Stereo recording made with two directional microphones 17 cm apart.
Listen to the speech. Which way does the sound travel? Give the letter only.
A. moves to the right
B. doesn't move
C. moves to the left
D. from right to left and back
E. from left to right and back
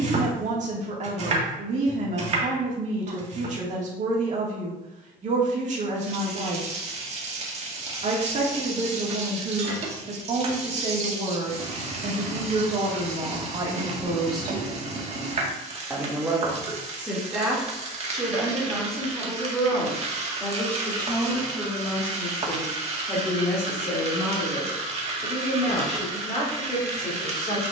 C.